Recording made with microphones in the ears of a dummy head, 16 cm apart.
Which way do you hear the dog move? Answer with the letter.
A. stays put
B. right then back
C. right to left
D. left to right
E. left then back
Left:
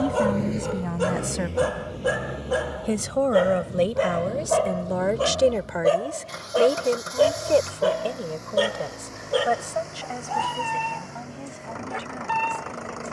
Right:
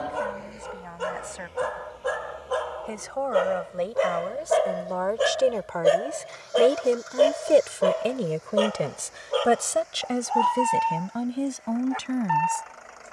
B.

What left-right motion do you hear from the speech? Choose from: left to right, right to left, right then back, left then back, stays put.
left to right.